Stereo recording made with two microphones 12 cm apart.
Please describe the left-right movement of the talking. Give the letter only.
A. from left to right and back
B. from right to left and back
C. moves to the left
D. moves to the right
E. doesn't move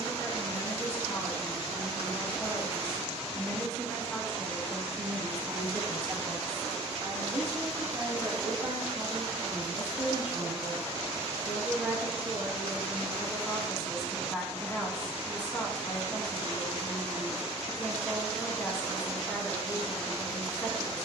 A.